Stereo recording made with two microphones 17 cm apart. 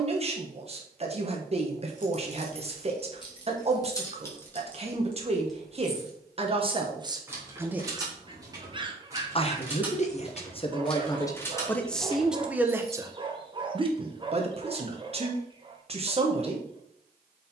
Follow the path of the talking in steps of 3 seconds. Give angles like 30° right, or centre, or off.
40° right, 40° right, 20° right, 30° left, 20° right, 40° right.